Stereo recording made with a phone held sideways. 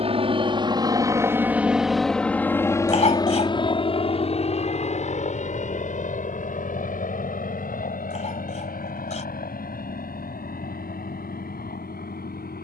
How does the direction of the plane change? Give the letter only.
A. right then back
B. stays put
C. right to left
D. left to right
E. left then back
C.